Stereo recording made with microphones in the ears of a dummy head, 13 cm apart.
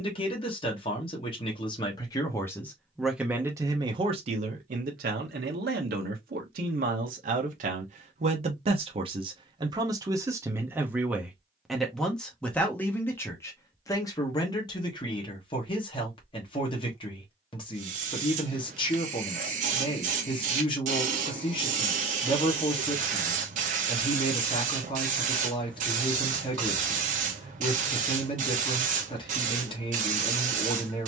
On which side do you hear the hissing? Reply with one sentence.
In this clip you hear the hissing on the right.